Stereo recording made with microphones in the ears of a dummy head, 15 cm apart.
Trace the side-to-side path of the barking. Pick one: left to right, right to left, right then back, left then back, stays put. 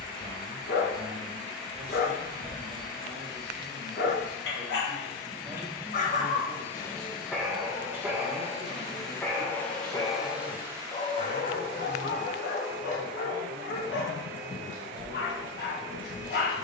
right then back.